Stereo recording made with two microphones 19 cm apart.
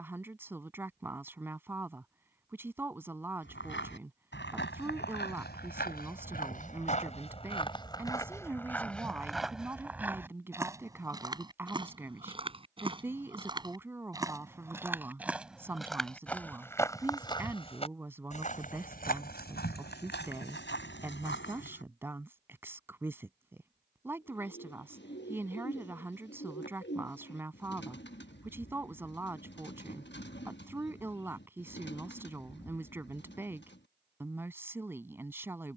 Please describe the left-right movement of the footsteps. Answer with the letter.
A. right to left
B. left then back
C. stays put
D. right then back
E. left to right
D.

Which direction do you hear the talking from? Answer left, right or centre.
centre.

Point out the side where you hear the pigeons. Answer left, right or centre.
left.